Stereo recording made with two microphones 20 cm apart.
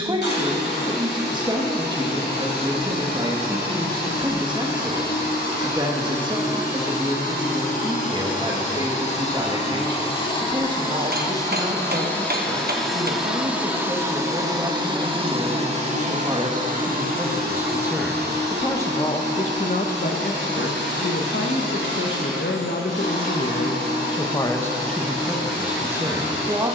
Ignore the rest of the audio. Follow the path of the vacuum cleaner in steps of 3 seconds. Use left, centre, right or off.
left, left, left, left, centre, right, right, right, right.